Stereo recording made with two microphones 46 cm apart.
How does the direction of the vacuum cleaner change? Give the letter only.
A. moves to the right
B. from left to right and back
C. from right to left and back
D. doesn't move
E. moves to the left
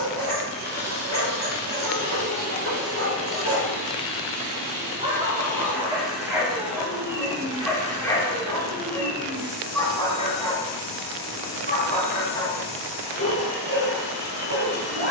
A.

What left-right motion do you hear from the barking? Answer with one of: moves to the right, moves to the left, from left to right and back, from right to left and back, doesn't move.
moves to the left.